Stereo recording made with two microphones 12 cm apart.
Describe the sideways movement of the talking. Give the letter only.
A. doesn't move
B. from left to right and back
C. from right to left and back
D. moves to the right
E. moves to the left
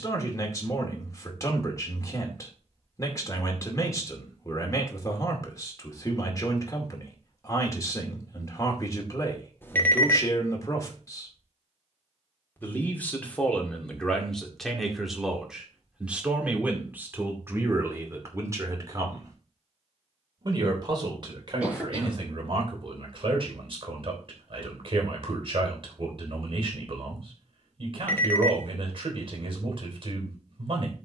D.